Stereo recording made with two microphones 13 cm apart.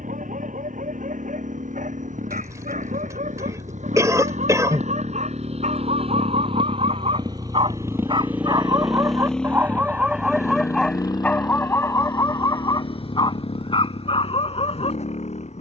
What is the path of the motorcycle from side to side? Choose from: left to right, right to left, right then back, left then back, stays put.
right to left.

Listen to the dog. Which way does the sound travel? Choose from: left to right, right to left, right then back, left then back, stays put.
right to left.